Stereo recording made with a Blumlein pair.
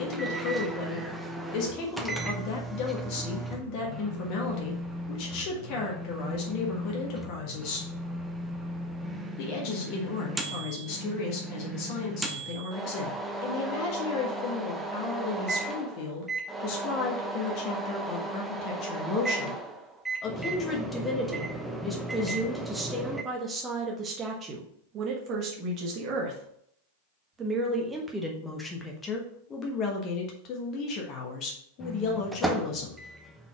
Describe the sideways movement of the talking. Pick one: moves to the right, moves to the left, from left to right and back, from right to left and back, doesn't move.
from left to right and back.